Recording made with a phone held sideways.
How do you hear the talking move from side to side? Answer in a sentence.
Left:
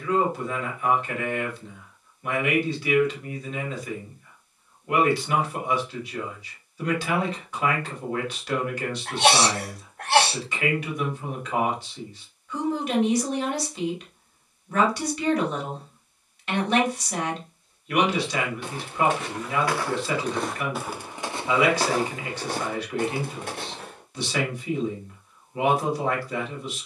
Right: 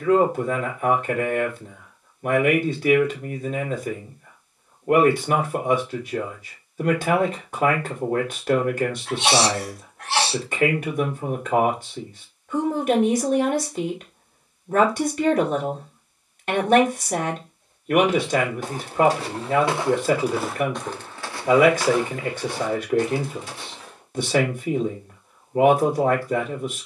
In this clip you hear the talking stay put.